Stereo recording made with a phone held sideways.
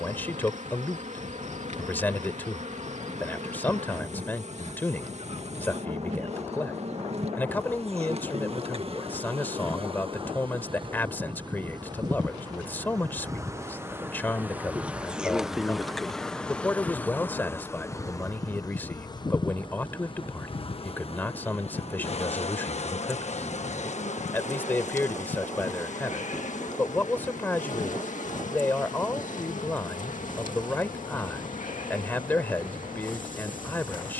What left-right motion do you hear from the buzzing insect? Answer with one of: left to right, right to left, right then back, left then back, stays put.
right to left.